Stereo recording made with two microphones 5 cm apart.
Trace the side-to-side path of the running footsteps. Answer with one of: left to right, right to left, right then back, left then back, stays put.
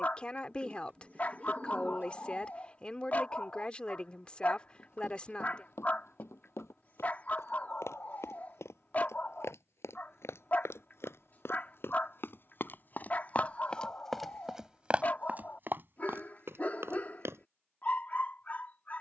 left to right.